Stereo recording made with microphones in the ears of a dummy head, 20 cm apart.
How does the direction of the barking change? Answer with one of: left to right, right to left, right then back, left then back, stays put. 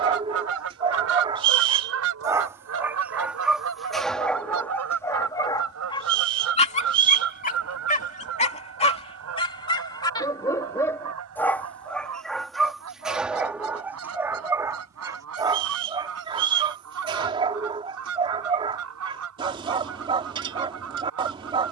left then back.